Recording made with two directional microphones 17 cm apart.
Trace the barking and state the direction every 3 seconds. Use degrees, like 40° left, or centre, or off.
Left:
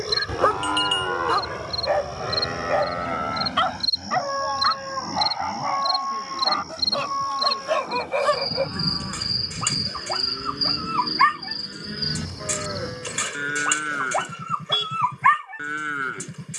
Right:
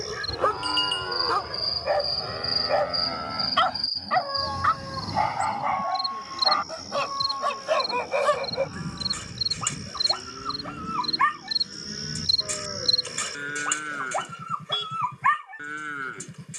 20° left, 10° right, centre, 20° left, 30° left, 30° left.